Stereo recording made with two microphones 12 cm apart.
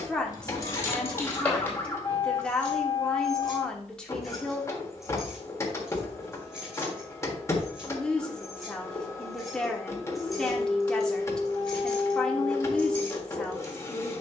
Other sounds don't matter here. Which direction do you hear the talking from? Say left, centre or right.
centre.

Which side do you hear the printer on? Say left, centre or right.
left.